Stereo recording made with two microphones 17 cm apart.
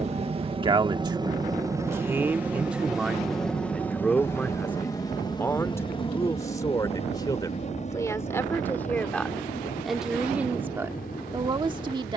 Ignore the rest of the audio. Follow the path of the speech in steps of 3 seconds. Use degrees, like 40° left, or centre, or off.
20° right, 10° left, 20° left, 10° right.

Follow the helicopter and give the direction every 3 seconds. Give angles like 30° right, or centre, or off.
20° right, 10° left, 40° left, 50° left.